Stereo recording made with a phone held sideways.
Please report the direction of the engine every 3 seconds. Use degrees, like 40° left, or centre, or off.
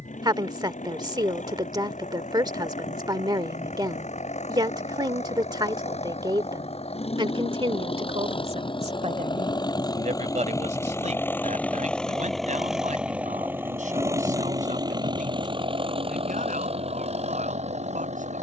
60° left, 60° left, 50° left, 20° left, 10° right, 40° right.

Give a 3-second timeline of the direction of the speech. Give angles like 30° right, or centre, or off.
30° right, 30° right, 40° right, 60° right, 70° right, 70° right.